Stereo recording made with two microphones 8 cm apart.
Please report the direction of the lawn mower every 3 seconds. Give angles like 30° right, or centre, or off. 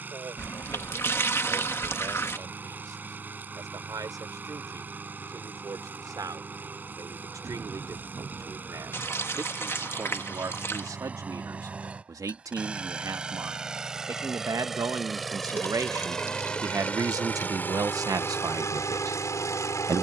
30° right, 30° right, 30° right, 20° right, 10° right, 10° left, 40° left.